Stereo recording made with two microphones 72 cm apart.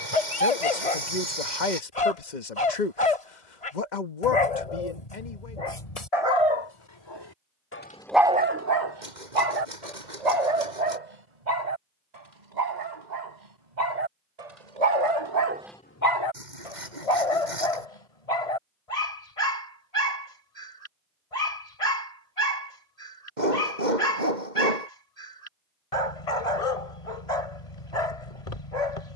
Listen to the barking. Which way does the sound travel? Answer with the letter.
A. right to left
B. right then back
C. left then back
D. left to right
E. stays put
B.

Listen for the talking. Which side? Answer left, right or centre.
left.